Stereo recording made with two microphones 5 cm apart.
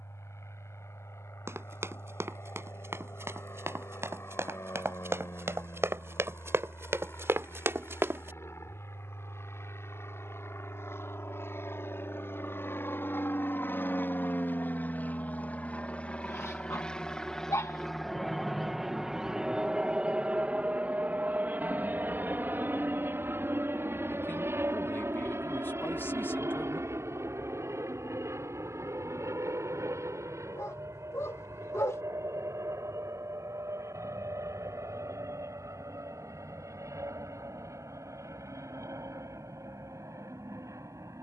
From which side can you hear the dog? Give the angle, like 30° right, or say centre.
70° left.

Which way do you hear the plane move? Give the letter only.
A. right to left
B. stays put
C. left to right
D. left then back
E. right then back
C.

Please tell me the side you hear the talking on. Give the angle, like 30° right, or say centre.
40° left.